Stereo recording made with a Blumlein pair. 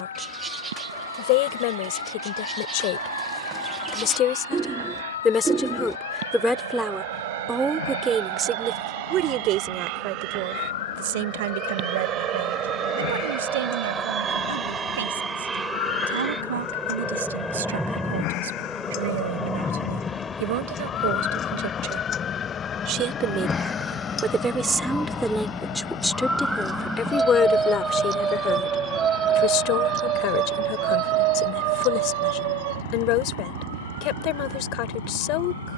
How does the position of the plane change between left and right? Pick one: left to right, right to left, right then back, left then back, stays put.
right to left.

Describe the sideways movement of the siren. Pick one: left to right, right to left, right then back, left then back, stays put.
left to right.